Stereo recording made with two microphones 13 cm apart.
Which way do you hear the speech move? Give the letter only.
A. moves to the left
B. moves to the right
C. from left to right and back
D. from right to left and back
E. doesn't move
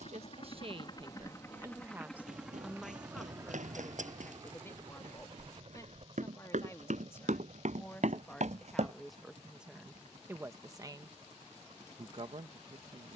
D.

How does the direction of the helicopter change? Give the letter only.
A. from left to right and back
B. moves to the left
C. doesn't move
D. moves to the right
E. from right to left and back
D.